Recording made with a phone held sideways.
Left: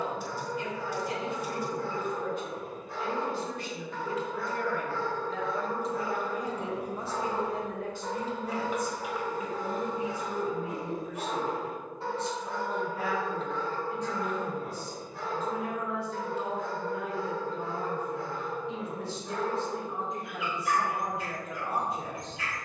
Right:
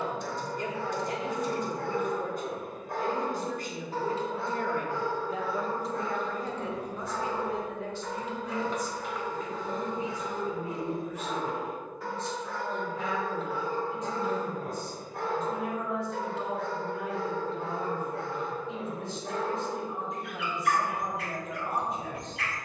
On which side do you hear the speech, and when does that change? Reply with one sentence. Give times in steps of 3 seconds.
You can hear the speech on the right from 0 s and on the left from 6 s.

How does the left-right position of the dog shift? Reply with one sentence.
In this clip you hear the dog go left and come back.